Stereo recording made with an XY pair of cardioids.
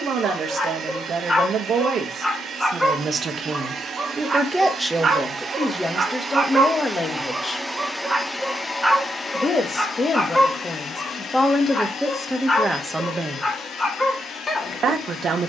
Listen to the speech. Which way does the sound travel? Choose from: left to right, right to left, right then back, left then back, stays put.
left then back.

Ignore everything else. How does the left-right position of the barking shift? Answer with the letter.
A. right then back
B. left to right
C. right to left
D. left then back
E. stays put
A.